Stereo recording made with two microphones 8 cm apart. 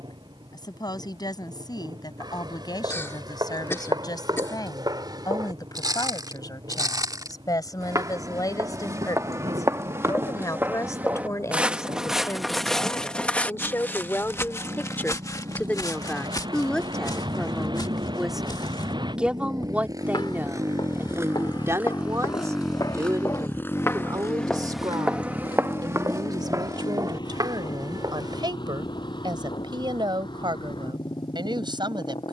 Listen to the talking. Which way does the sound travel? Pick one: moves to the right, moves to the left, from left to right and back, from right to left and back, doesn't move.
moves to the right.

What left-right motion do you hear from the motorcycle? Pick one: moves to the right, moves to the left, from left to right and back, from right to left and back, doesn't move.
moves to the left.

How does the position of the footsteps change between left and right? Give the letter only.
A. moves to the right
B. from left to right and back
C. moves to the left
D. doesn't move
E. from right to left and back
E.